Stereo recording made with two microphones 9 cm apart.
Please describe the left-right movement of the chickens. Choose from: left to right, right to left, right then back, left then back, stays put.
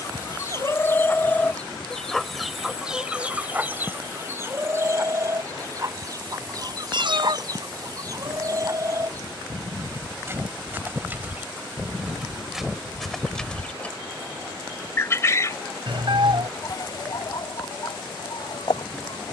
right then back.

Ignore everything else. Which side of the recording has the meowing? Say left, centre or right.
right.